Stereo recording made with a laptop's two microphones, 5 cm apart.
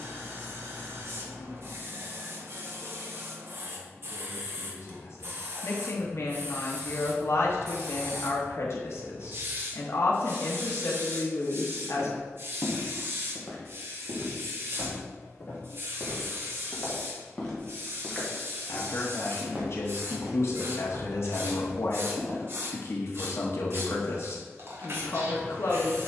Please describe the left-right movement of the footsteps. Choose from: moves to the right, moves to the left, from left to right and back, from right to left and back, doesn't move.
from right to left and back.